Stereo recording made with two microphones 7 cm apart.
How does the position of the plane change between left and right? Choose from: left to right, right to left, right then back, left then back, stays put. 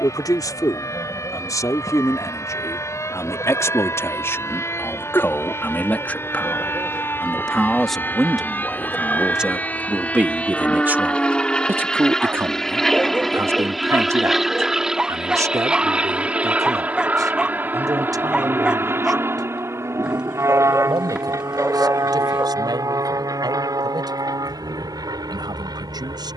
left to right.